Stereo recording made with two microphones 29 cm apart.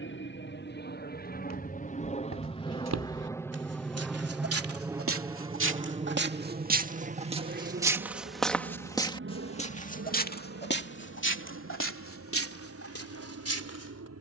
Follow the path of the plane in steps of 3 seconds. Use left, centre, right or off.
left, centre, right, right, right.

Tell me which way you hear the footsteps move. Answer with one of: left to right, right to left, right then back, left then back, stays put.
right to left.